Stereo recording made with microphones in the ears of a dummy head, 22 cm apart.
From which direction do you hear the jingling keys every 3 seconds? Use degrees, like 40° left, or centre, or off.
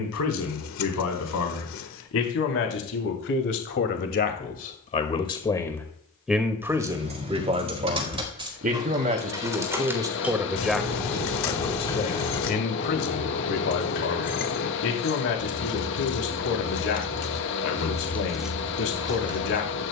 off, off, 30° right, centre, 40° left, 60° left, 10° right.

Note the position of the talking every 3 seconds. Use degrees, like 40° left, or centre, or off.
70° left, 40° left, 20° right, 10° right, 50° left, 60° left, 60° left.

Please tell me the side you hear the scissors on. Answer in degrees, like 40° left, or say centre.
60° left.